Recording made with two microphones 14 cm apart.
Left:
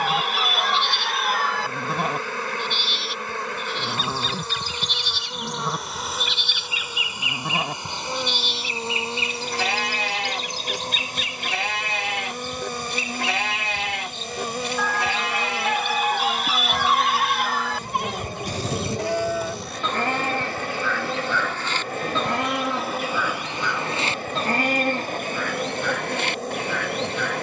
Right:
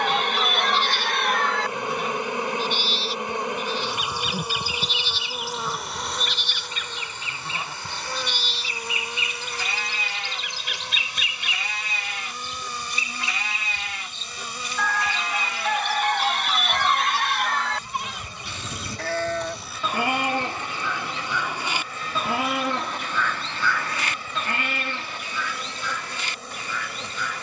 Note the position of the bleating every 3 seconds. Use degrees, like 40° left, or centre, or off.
70° left, 70° left, 70° left, 70° left, 70° left, 70° left, 10° left, centre, 60° left.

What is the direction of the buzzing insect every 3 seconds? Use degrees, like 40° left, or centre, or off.
20° right, 10° right, 20° left, 40° left, 60° left, 60° left, 60° left, 60° left, 60° left.